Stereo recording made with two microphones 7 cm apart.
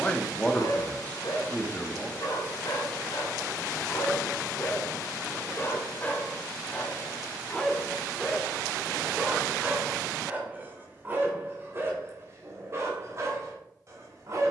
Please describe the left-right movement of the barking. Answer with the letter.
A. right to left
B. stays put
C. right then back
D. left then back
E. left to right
E.